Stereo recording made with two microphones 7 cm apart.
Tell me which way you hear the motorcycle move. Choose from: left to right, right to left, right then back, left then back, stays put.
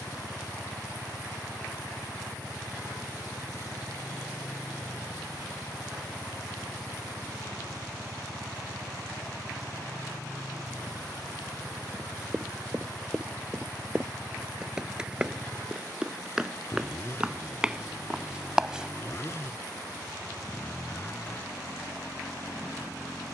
stays put.